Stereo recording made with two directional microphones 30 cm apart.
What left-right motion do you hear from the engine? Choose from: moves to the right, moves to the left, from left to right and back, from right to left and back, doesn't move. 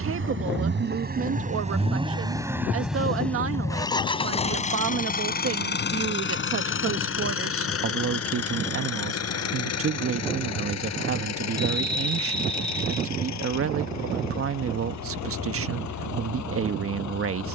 moves to the left.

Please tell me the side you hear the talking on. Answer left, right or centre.
right.